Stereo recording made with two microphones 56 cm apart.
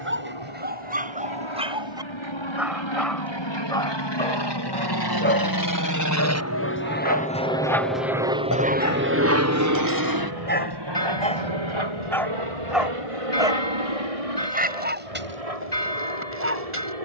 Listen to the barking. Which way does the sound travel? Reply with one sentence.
You can hear the barking go left and come back.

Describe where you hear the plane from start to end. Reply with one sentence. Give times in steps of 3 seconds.
In this clip you hear the plane on the left from 0 s, in the centre from 6 s and on the right from 9 s.